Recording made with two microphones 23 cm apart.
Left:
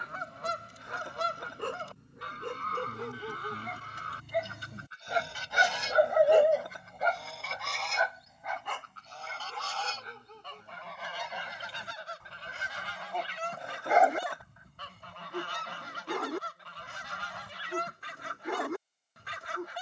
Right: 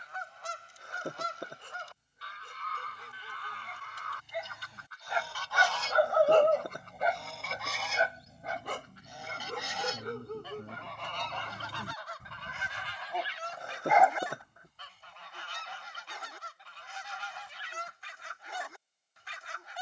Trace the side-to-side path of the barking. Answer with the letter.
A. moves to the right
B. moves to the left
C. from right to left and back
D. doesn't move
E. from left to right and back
E.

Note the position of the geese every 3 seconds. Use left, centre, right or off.
left, left, centre, centre, left, left, left.